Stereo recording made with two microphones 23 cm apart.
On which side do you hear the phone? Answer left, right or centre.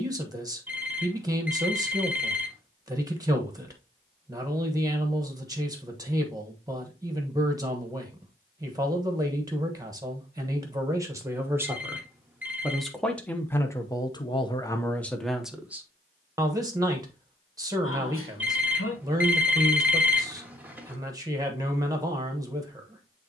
centre.